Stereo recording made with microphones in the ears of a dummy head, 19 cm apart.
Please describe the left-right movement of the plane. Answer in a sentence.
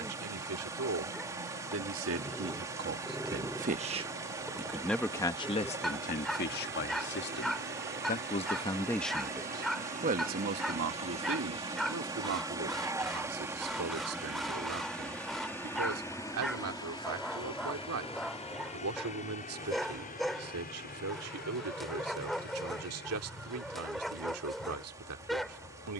In this clip you hear the plane go from the right side to the left.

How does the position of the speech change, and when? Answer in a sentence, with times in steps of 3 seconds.
You can hear the speech on the right from 0 s, in the centre from 3 s, on the left from 6 s and on the right from 9 s.